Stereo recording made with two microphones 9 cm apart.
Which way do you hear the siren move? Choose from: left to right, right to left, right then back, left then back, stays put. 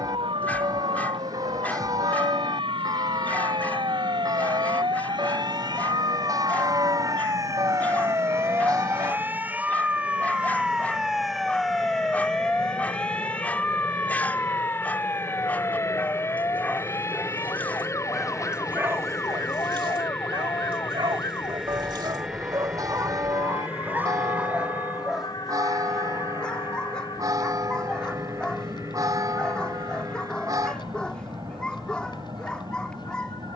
right to left.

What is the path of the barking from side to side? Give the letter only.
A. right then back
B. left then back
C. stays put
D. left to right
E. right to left
A.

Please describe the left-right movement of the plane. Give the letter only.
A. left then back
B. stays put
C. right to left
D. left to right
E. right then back
D.